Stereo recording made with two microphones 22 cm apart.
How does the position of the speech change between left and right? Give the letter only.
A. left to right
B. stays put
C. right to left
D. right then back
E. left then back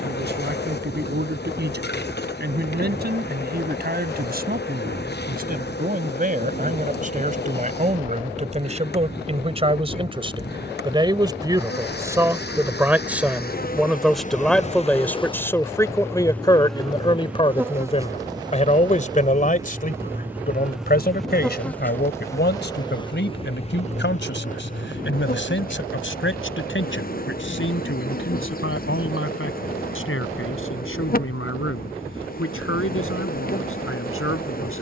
C.